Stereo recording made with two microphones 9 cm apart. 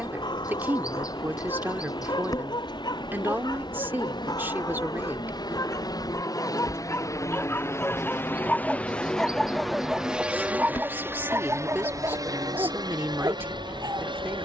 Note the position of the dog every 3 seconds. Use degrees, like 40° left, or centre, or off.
60° left, 50° left, 30° left, 10° right, 40° right.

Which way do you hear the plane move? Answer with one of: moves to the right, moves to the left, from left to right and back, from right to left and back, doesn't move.
moves to the right.